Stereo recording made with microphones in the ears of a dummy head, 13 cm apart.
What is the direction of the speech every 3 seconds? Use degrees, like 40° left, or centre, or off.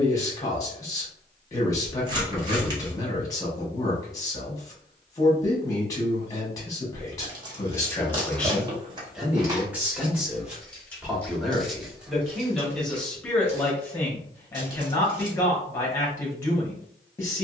20° left, 20° left, 20° left, 10° right, 10° left, 20° left.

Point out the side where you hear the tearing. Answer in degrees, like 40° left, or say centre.
30° right.